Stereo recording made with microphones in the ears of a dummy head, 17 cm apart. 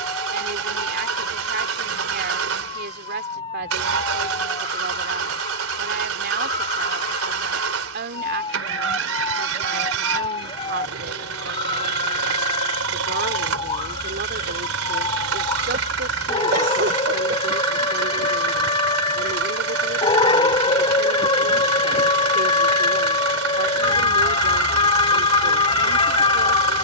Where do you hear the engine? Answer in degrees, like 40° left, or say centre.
80° right.